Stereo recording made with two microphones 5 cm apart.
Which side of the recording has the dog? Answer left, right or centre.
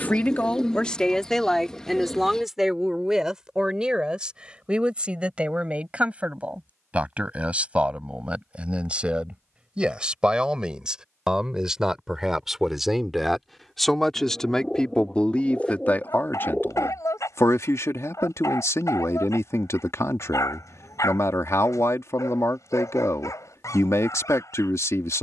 left.